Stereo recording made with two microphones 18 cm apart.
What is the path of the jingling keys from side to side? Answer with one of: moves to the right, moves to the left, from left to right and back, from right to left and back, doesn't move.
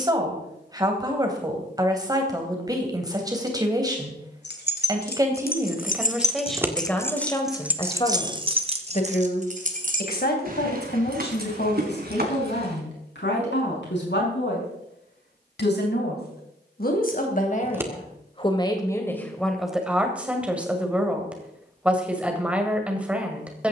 moves to the right.